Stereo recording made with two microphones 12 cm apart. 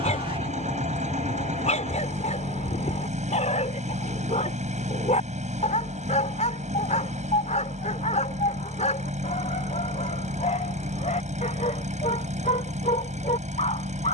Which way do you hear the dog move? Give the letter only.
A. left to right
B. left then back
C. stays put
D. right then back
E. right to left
C.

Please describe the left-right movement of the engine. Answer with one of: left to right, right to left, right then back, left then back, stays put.
stays put.